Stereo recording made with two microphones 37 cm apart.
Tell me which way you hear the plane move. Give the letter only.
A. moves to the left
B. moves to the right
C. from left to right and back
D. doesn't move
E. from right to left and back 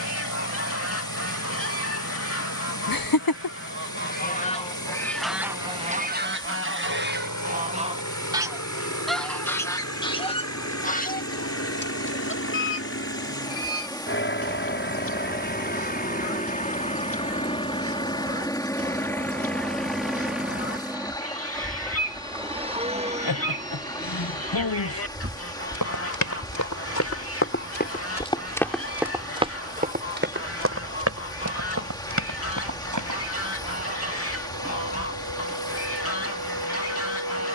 B.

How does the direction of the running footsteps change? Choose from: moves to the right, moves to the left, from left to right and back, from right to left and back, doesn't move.
moves to the right.